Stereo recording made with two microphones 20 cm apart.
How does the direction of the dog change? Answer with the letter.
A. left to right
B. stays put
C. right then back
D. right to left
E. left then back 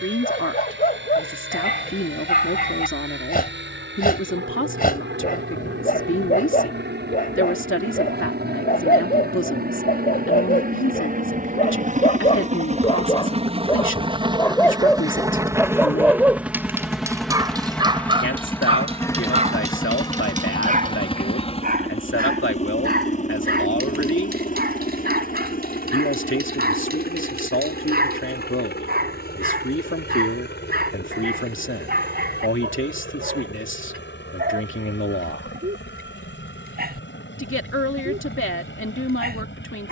A.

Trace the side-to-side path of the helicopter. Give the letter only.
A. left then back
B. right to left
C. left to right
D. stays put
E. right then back
B.